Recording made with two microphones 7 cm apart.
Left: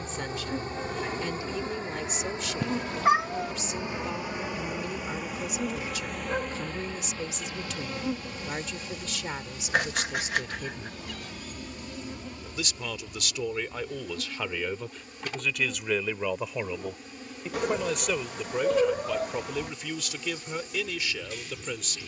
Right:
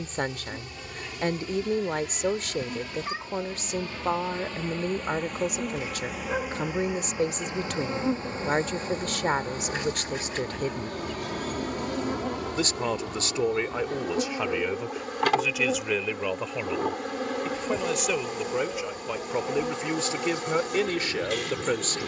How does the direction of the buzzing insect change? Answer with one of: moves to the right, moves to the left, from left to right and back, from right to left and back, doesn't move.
moves to the right.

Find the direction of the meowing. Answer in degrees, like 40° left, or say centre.
60° left.